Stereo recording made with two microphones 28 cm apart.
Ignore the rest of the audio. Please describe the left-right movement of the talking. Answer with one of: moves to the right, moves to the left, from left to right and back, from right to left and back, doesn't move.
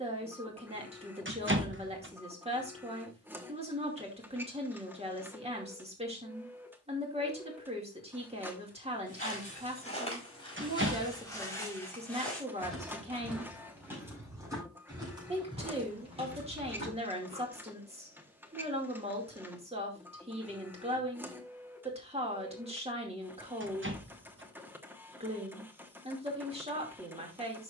doesn't move.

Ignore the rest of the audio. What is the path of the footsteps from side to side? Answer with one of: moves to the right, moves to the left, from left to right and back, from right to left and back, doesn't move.
moves to the right.